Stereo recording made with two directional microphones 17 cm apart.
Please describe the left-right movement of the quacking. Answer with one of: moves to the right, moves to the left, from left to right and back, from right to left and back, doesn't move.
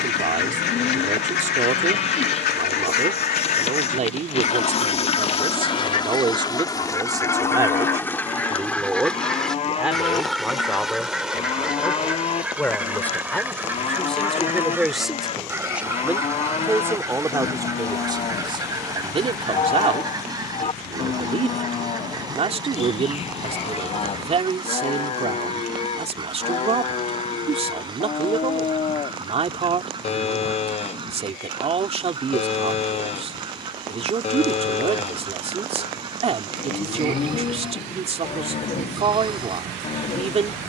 moves to the right.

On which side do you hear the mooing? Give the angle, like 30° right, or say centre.
30° left.